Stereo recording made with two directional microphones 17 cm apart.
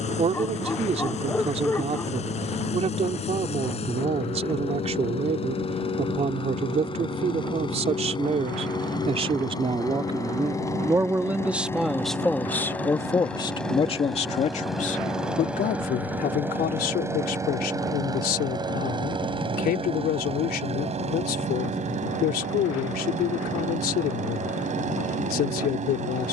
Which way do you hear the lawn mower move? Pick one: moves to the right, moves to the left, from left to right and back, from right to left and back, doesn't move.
moves to the right.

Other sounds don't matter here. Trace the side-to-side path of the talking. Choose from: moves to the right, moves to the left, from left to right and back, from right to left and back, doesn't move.
moves to the left.